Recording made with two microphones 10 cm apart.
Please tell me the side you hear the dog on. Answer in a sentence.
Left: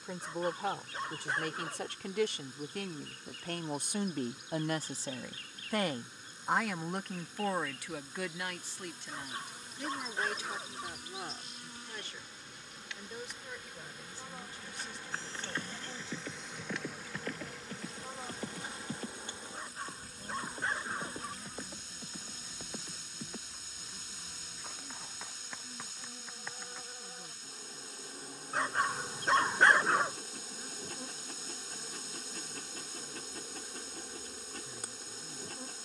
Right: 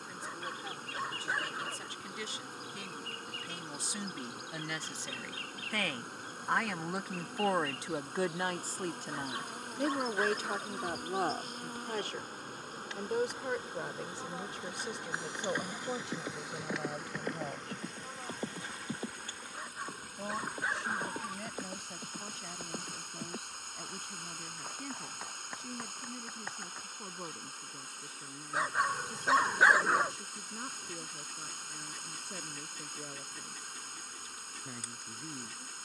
In this clip you hear the dog in the centre.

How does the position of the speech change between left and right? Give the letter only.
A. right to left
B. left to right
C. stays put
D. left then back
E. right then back
B.